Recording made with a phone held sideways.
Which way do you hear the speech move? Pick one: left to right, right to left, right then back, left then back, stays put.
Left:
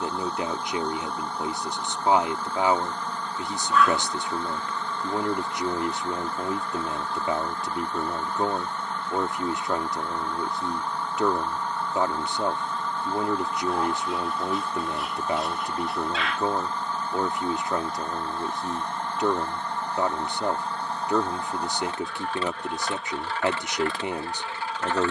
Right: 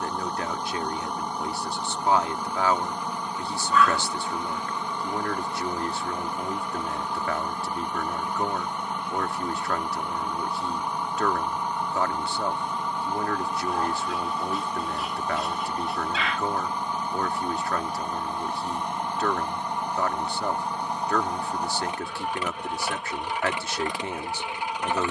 stays put.